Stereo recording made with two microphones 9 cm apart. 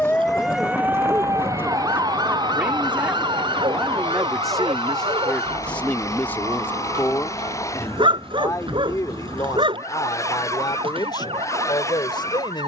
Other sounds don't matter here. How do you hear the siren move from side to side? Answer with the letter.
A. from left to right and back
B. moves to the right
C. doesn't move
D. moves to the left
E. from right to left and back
B.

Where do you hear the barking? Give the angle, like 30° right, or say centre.
70° right.